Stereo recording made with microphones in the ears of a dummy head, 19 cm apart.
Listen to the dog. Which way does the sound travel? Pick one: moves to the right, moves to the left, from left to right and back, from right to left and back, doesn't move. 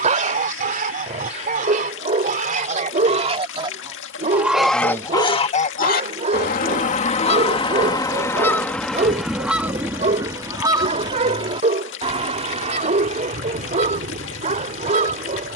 doesn't move.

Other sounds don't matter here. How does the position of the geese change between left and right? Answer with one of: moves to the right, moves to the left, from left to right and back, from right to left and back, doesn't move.
from right to left and back.